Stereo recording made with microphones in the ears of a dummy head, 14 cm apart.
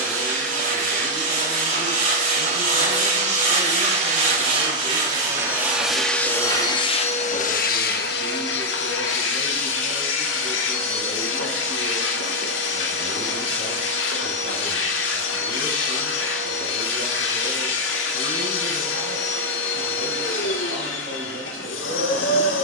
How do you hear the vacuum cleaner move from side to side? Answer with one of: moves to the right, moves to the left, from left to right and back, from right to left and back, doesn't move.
moves to the left.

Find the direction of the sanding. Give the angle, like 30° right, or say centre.
50° right.